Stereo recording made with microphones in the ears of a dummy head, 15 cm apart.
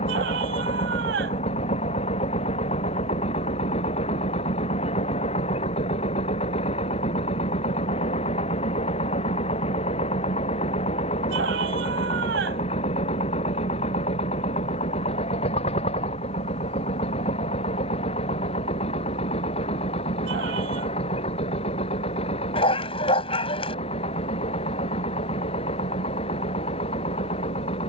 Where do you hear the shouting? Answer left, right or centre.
right.